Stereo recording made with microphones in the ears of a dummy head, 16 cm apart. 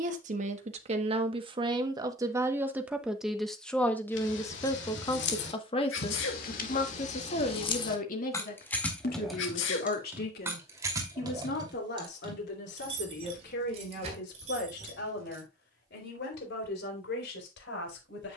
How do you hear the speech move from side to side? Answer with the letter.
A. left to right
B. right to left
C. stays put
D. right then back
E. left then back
B.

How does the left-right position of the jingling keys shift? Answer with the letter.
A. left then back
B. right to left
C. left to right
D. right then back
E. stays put
C.